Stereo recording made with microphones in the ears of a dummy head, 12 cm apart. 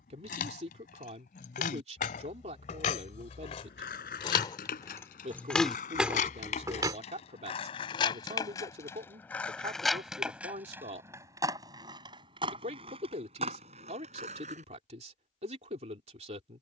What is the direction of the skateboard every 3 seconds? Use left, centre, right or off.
off, left, left, centre, right, off.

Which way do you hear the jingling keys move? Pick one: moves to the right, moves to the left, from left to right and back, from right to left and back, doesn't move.
moves to the right.